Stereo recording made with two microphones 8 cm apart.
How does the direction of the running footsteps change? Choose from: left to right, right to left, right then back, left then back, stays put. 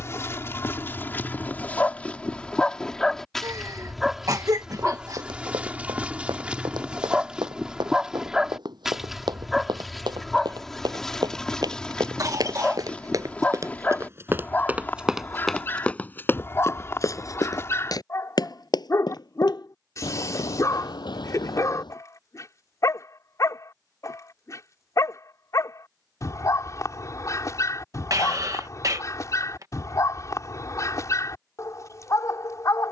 right to left.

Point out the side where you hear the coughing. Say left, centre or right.
right.